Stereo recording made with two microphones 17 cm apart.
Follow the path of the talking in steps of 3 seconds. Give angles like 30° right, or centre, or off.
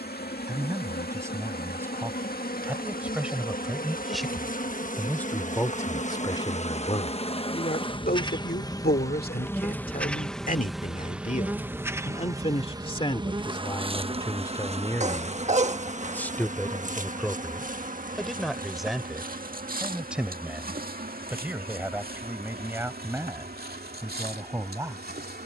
10° right, centre, 50° left, 50° left, 30° left, 10° left, centre, 10° right, 20° right.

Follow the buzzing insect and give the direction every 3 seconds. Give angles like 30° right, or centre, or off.
70° left, 50° left, 30° left, centre, 30° right, 50° right, 60° right, 60° right, 70° right.